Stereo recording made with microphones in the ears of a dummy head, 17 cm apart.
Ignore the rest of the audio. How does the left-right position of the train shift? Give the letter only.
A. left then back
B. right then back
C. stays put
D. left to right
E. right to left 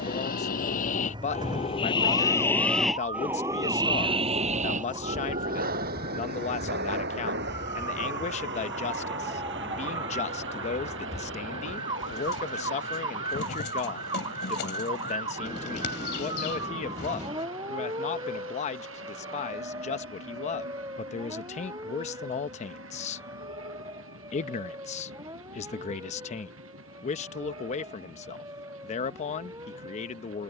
D.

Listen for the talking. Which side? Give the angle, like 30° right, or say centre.
40° left.